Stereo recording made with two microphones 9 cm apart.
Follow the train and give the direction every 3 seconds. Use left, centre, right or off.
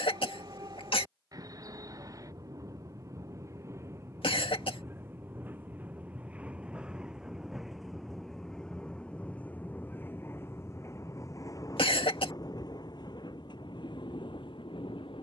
right, right, centre, left, left.